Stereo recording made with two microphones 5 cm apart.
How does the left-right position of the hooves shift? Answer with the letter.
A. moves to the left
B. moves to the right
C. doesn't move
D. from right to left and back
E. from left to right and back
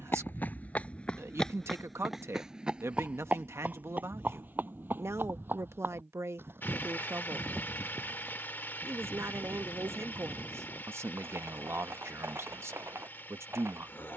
B.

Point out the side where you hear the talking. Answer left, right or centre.
right.